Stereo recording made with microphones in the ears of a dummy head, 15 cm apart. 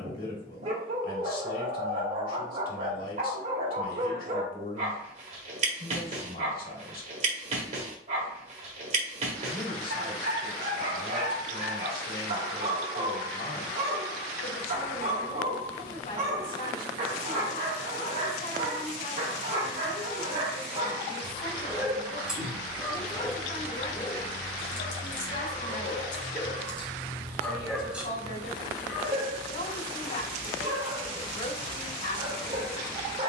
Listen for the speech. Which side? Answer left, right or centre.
left.